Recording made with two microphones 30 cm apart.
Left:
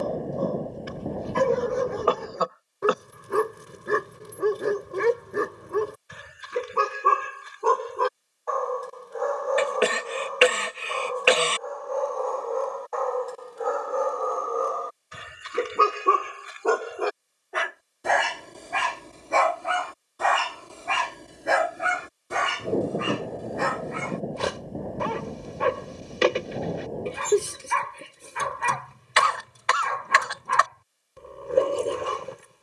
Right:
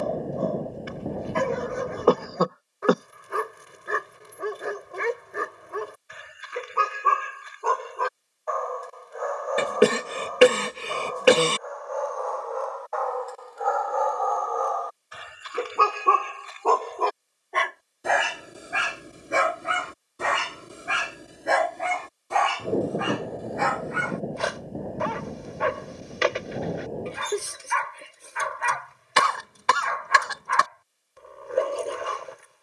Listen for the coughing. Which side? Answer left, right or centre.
right.